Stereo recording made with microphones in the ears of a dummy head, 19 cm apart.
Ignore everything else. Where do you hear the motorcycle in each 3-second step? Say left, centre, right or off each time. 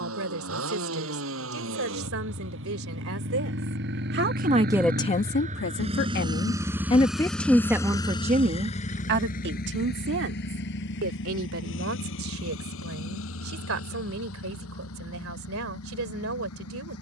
right, right, centre, left, left, left.